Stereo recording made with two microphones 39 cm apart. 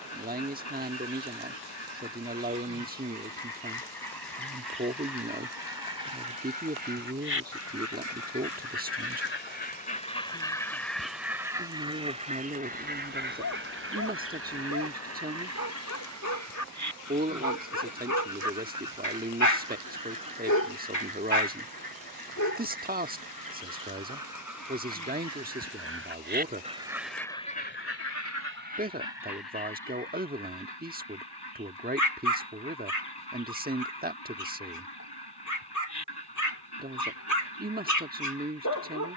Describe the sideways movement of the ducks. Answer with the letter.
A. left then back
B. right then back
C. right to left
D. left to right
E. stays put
B.